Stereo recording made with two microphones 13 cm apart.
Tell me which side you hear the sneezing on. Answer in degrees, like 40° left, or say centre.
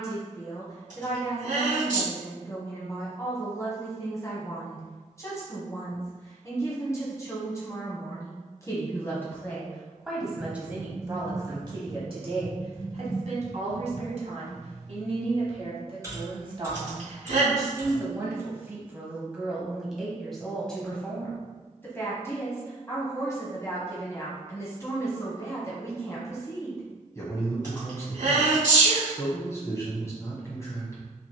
70° right.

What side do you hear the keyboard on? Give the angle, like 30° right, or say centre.
20° right.